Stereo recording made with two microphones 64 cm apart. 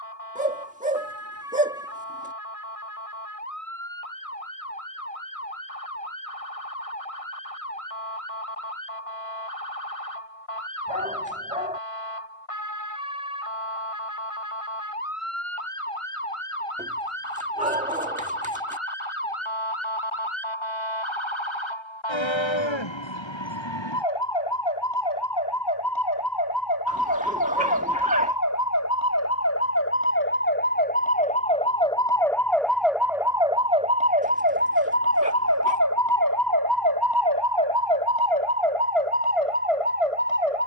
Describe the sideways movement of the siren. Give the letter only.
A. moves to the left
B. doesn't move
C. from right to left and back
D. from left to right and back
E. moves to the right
E.